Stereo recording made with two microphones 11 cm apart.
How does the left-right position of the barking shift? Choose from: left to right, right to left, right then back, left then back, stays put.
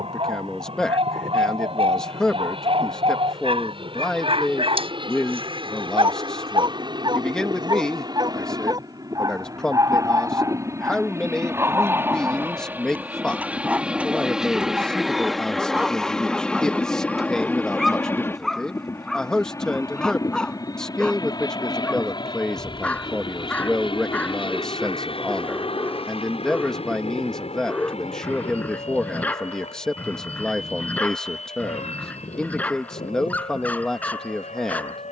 right to left.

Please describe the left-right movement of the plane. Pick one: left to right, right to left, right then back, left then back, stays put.
right to left.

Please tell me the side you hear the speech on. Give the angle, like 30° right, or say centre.
10° left.